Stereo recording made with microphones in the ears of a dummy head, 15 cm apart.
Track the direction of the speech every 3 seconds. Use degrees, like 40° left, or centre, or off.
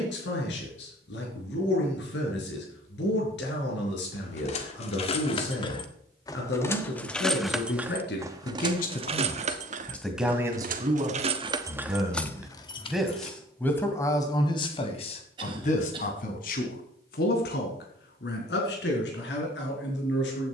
80° left, 80° left, 70° left, 10° right, 10° left, 50° left, 70° left.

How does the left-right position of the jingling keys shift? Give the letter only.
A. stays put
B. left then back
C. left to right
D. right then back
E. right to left
D.